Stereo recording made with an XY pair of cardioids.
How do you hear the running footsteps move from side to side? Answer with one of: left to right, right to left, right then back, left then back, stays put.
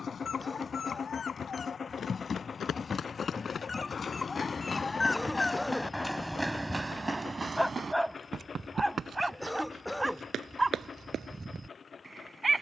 left to right.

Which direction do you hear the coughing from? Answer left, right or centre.
centre.